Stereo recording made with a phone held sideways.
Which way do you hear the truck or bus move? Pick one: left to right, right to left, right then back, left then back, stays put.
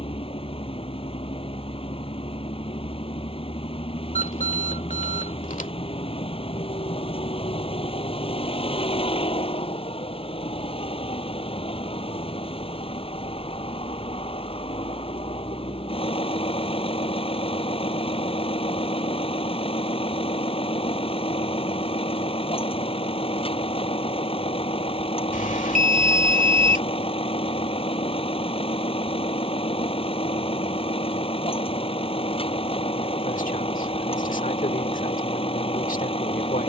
stays put.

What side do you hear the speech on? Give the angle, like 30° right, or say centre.
70° left.